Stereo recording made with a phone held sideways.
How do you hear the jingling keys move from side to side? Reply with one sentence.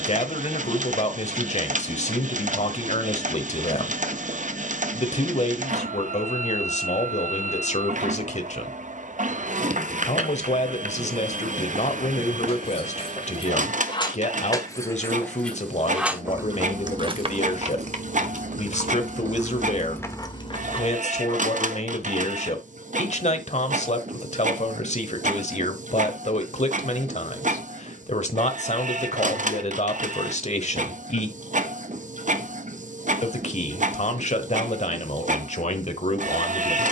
In this clip you hear the jingling keys go right and come back.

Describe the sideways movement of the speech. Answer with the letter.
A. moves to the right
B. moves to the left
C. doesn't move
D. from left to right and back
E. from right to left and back
C.